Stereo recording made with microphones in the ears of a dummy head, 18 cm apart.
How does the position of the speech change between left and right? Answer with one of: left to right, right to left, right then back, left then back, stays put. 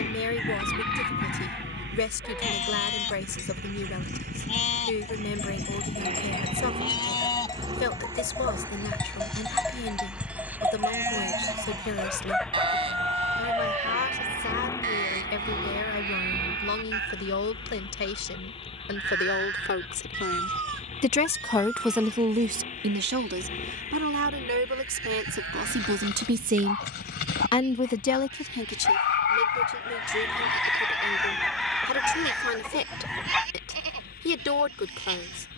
right then back.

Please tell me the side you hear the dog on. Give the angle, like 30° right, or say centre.
60° left.